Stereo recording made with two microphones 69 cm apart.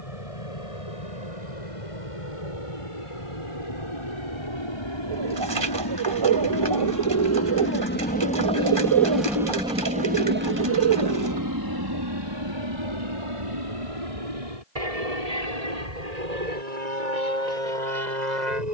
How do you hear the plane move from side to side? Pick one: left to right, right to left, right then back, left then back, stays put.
left to right.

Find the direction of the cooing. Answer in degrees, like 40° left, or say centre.
40° right.